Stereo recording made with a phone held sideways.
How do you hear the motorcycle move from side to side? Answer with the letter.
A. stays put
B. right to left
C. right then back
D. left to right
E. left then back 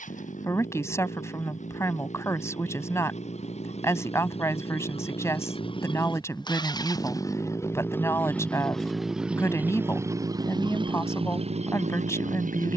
D.